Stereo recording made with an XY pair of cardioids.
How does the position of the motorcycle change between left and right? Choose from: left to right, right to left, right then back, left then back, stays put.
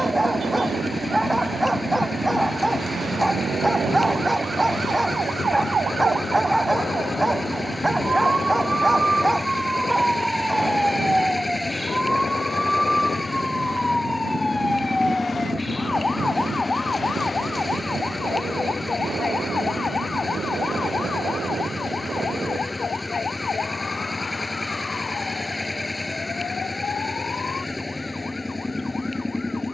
stays put.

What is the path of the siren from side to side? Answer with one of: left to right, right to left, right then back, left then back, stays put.
right to left.